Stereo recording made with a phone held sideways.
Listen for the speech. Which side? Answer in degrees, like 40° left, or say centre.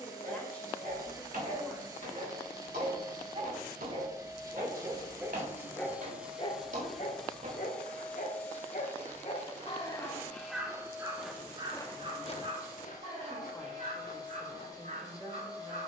10° left.